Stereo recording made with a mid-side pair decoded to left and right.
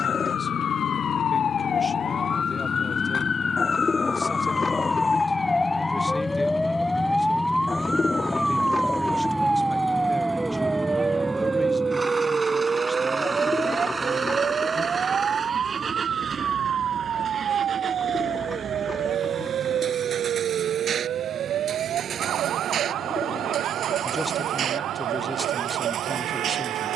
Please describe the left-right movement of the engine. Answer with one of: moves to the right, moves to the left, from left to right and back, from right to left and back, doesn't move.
moves to the right.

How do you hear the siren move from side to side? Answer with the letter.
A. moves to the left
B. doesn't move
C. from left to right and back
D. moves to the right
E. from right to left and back
D.